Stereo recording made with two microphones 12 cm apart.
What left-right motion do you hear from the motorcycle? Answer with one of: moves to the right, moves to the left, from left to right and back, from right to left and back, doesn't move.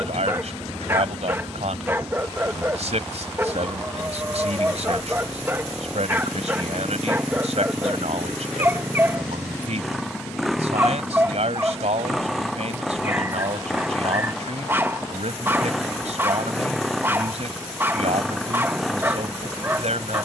doesn't move.